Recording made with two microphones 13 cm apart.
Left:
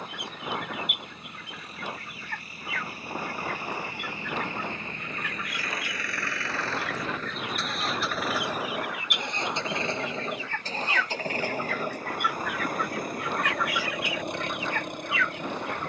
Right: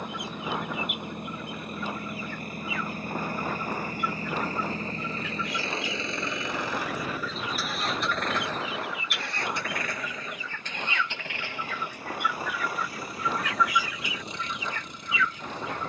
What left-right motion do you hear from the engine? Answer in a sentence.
You can hear the engine travel towards the left.